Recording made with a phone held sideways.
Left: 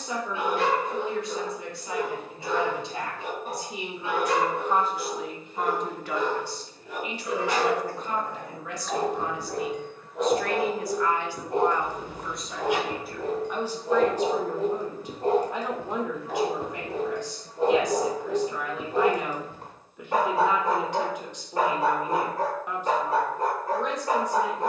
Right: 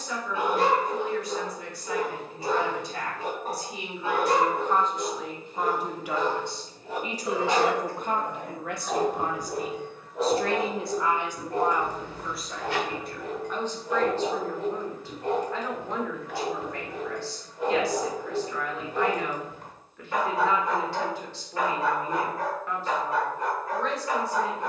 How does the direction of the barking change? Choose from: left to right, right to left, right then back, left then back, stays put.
right to left.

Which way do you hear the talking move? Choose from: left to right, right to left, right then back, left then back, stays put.
right then back.